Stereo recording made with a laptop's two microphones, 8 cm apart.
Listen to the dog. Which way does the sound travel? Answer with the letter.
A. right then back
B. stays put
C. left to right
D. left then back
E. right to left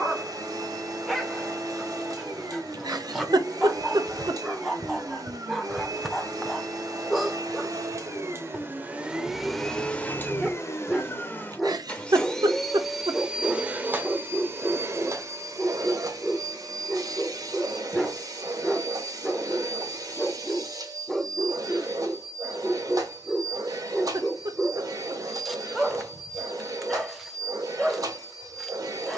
B.